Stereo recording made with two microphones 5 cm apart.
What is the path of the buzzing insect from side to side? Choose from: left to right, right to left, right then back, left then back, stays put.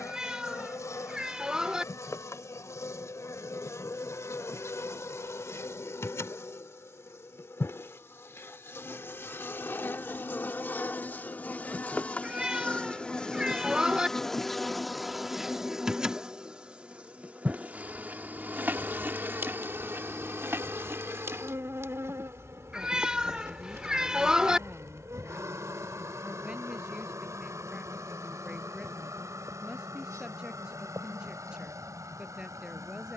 left to right.